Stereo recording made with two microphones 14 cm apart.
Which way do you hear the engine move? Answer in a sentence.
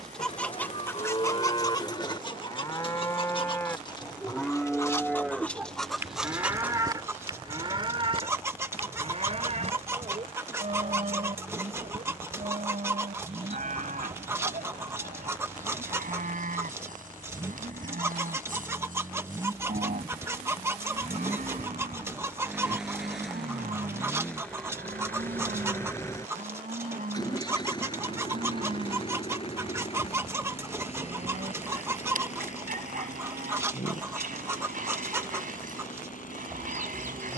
You can hear the engine move to the left.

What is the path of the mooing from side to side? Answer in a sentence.
You can hear the mooing move from left to right.